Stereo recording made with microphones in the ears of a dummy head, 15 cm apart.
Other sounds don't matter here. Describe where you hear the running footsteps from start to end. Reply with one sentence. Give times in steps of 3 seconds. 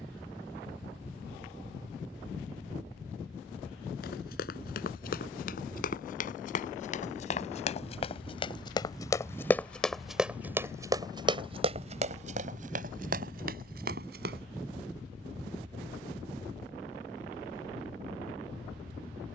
In this clip you hear the running footsteps not at all from 0 s, on the left from 3 s, in the centre from 9 s, on the right from 12 s and not at all from 15 s.